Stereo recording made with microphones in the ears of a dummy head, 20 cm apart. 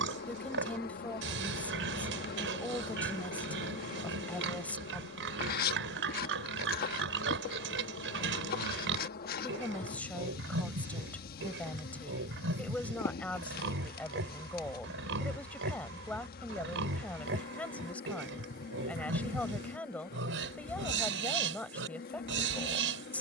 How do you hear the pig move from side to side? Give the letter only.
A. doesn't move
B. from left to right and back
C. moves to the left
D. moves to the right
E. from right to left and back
A.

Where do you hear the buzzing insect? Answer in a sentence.
In this clip you hear the buzzing insect on the left.